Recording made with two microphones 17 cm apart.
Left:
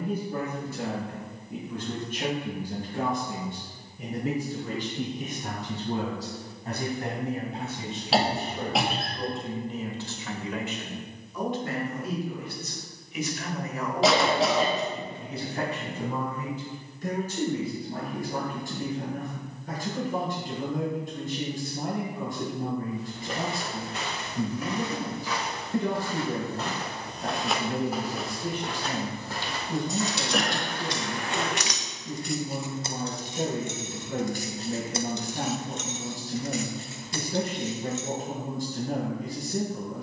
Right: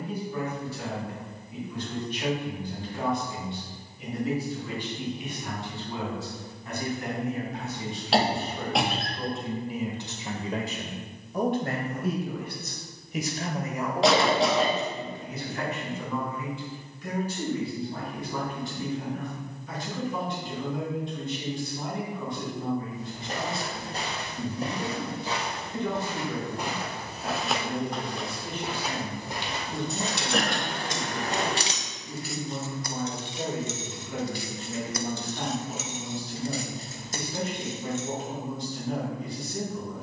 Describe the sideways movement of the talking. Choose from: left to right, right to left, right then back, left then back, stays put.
right then back.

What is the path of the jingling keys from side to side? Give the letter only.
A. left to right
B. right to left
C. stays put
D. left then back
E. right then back
D.